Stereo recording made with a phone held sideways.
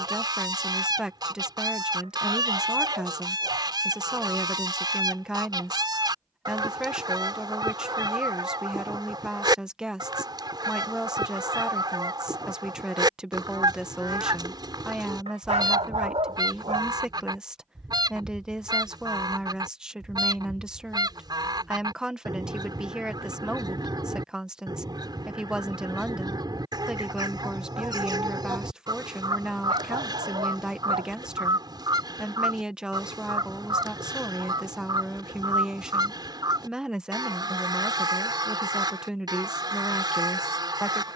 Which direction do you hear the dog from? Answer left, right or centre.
right.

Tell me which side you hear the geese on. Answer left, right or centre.
right.